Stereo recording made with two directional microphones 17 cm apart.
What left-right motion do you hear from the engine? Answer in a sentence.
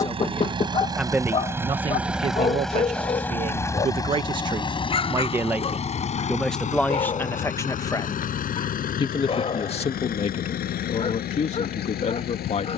You can hear the engine move to the left.